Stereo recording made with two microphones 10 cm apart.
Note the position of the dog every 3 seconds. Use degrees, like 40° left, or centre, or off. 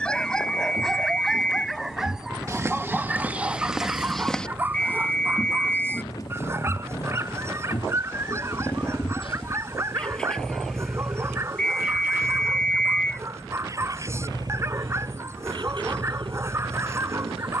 centre, 20° right, 20° right, 30° right, 30° right, 30° right.